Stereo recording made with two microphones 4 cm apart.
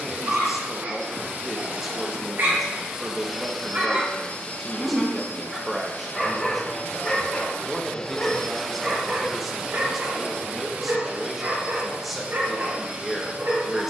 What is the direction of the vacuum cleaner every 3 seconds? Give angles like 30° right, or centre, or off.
40° right, 30° left, 20° left, 20° right, 30° right.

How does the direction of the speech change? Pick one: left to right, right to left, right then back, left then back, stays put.
stays put.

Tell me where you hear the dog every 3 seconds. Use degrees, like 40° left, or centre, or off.
60° right, 30° right, 10° left, 50° right, 60° right.